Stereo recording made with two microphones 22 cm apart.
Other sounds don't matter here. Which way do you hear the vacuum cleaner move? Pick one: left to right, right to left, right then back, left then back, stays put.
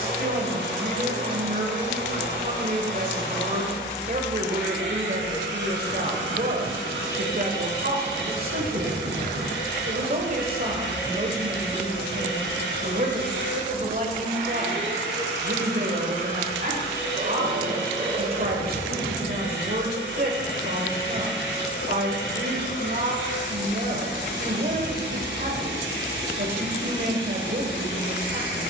stays put.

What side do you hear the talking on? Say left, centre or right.
right.